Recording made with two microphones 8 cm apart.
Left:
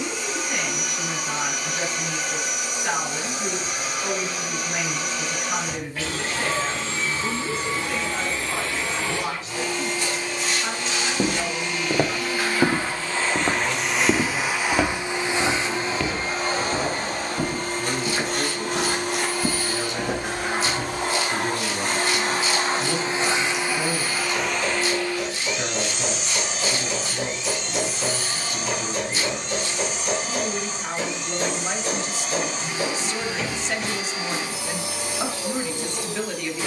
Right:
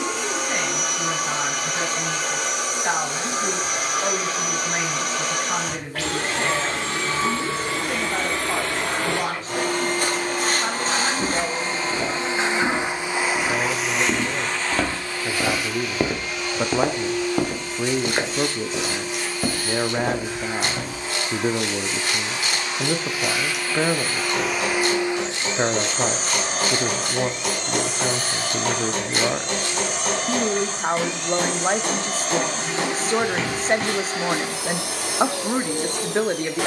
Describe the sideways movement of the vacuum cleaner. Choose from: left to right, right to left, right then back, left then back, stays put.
left then back.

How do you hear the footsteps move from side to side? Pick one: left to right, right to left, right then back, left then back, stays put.
left to right.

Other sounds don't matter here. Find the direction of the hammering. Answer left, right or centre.
right.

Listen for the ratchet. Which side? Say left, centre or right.
right.